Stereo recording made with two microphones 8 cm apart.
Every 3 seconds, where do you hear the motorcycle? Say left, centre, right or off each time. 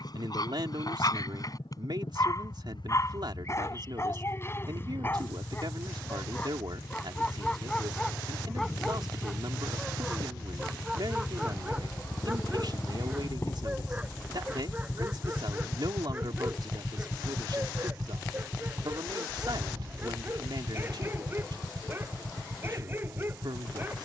left, left, left, left, left, centre, right, right.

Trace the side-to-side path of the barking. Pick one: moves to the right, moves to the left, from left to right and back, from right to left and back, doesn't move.
moves to the right.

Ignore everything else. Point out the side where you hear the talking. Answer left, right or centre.
right.